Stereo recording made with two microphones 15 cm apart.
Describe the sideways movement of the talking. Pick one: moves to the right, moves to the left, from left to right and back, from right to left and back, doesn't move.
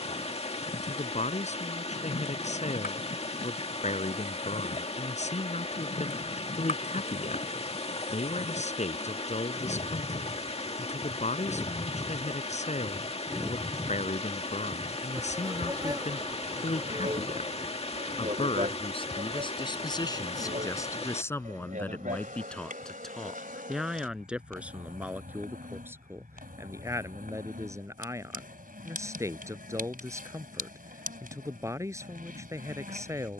moves to the right.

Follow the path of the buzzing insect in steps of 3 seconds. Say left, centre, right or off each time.
left, left, left, left, centre, right, right, right, right, right, right.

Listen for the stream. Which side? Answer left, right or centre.
left.